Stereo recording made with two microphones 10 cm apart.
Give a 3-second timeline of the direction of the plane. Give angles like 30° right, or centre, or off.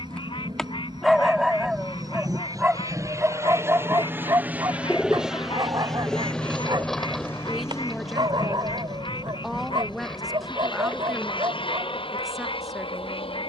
50° right, 20° right, 20° left, 50° left, 60° left.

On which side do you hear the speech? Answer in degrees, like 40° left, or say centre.
centre.